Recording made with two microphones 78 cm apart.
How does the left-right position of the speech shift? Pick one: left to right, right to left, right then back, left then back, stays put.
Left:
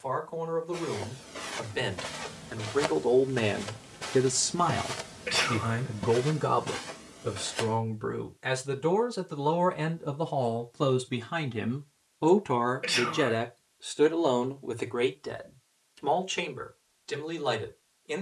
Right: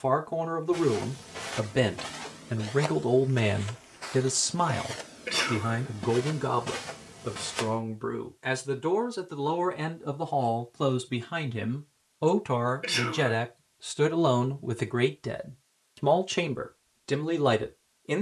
left then back.